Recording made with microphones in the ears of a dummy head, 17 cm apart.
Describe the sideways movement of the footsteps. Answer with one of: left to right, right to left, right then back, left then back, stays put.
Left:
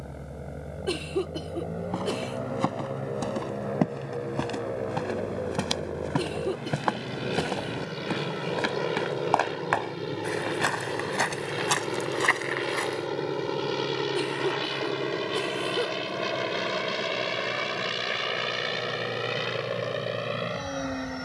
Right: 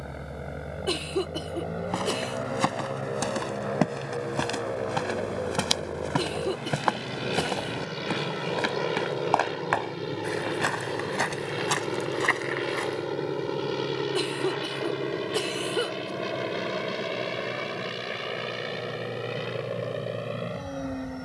right to left.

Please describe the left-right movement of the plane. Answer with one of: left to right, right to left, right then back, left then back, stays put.
right to left.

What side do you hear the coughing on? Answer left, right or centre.
right.